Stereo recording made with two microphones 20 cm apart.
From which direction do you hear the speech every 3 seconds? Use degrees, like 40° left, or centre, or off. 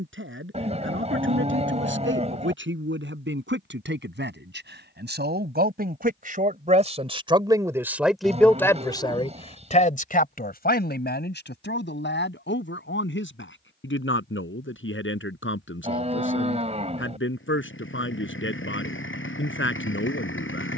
70° right, 60° right, 10° right, 50° left, 70° left, 70° left, 70° left.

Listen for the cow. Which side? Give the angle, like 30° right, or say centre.
30° right.